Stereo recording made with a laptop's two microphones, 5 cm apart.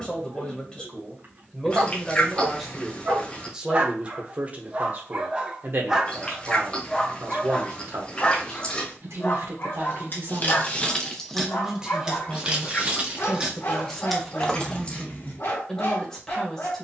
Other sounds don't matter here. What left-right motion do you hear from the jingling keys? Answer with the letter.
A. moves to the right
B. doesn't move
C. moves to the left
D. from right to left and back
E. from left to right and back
E.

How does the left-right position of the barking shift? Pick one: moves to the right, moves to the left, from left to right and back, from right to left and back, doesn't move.
moves to the left.